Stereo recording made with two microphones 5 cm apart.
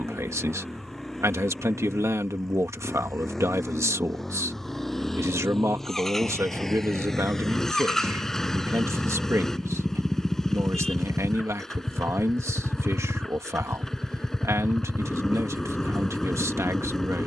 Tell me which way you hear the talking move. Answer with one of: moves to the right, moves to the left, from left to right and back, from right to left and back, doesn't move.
doesn't move.